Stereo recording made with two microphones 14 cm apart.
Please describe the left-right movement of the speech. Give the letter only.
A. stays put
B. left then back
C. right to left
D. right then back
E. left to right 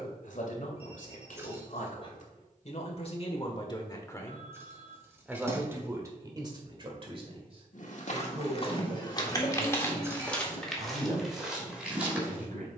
E.